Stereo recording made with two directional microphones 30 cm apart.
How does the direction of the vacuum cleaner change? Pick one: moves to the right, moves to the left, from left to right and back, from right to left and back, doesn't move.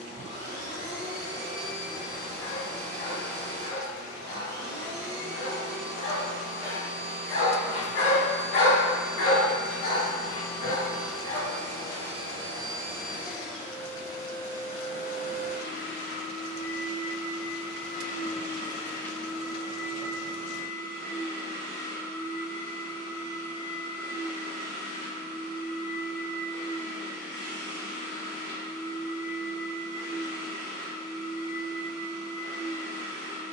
from right to left and back.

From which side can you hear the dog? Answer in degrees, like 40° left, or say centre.
50° left.